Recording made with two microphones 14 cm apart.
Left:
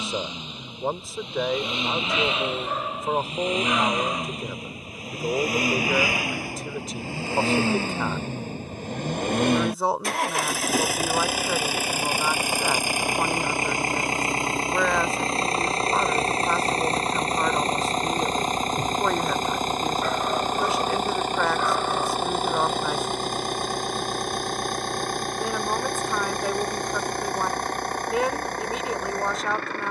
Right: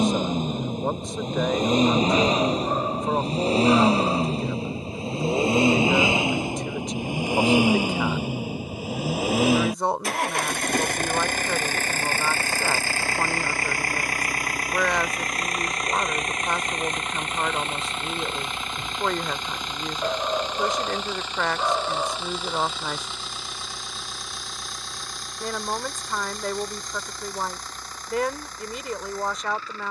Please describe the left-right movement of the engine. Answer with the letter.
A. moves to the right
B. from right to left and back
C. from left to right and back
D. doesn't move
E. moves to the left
E.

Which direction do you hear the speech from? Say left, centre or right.
centre.